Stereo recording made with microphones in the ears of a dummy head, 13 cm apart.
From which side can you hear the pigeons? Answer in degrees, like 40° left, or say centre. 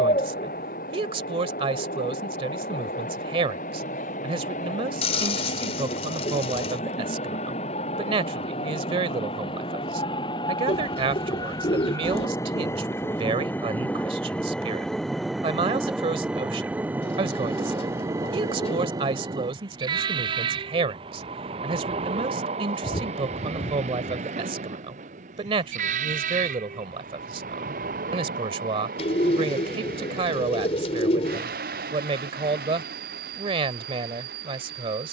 50° left.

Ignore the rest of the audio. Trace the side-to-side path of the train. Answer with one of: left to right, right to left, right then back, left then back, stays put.
left to right.